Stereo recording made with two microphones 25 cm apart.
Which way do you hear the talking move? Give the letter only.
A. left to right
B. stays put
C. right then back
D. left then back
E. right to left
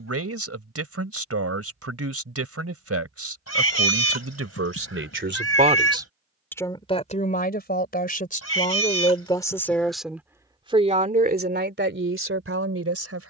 D.